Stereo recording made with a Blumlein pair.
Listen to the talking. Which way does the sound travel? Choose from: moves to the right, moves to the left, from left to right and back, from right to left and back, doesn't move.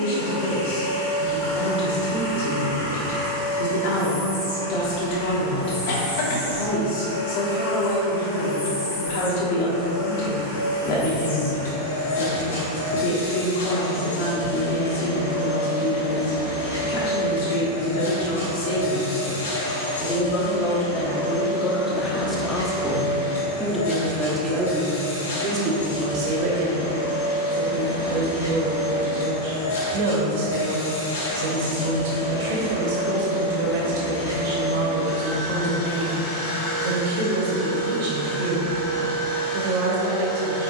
moves to the right.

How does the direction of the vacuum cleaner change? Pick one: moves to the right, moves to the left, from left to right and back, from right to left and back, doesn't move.
doesn't move.